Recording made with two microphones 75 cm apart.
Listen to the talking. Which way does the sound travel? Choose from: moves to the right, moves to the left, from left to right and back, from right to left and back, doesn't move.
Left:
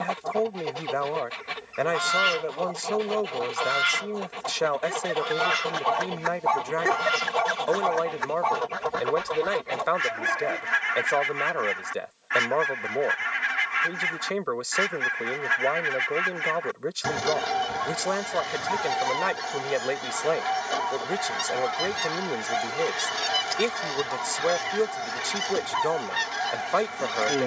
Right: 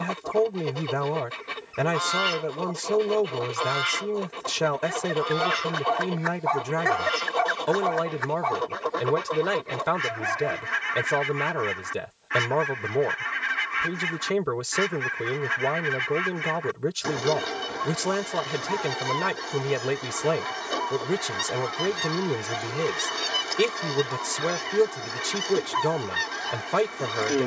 doesn't move.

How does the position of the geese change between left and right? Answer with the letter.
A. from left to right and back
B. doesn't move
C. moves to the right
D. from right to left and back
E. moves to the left
B.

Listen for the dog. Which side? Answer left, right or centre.
left.